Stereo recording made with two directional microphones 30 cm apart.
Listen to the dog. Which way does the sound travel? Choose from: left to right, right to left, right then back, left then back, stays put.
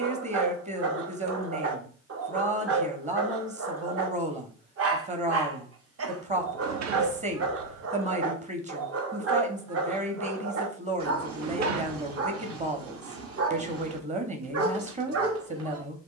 stays put.